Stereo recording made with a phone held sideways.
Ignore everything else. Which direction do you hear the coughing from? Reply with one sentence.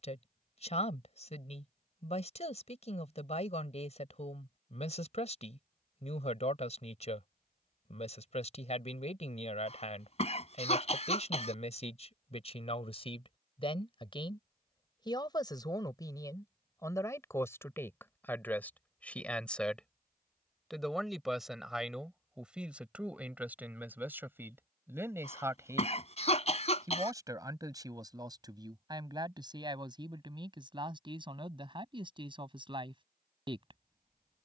In this clip you hear the coughing on the left.